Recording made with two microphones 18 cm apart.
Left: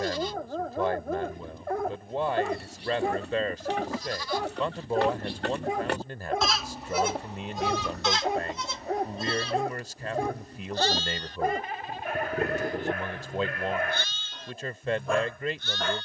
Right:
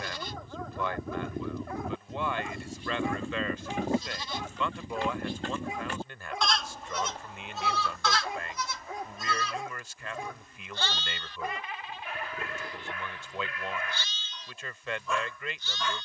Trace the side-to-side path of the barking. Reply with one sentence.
You can hear the barking stay put.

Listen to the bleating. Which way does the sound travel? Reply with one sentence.
In this clip you hear the bleating move from right to left.